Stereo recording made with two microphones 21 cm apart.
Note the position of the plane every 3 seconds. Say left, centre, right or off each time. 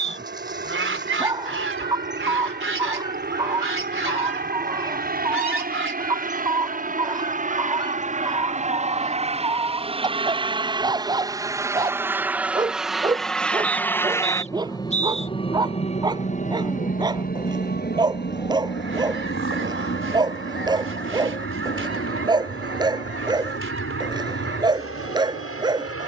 right, right, right, right, centre, left, left, left, left.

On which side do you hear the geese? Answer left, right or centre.
right.